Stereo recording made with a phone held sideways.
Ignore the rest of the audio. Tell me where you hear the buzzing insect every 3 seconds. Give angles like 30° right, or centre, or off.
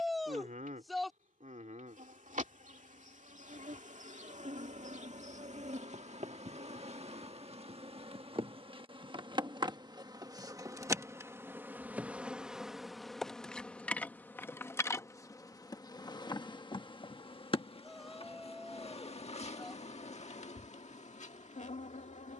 70° right, 60° right, 50° right, 20° right, 10° left, 30° left, 50° left, 60° left.